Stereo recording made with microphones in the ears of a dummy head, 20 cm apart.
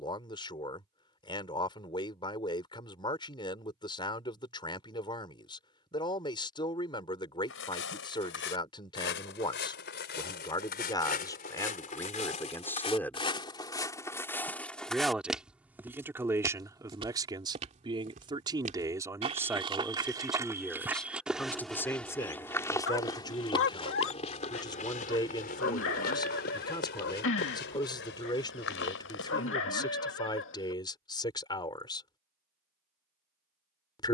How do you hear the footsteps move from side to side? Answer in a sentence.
In this clip you hear the footsteps go right and come back.